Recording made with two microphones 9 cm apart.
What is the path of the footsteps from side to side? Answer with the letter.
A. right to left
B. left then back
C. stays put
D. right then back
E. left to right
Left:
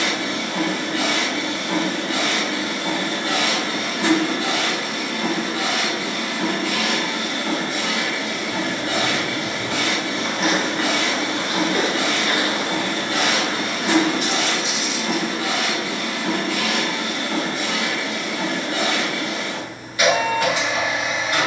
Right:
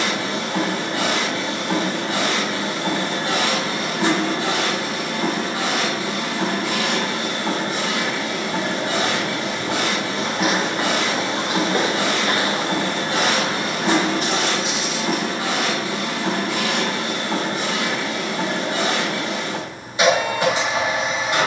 E.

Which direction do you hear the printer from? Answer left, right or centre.
right.